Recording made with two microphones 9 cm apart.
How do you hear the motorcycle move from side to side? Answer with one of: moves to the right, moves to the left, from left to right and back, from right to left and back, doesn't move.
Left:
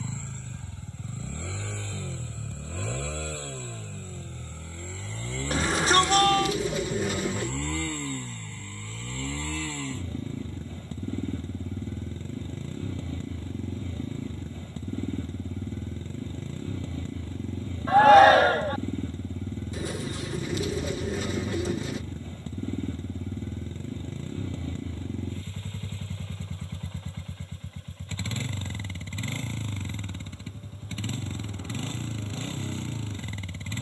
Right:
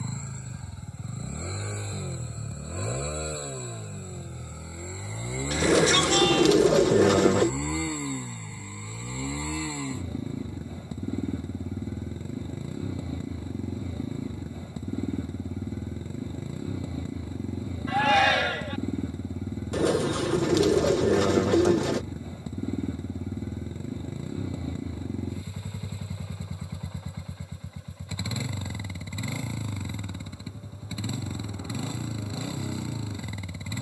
doesn't move.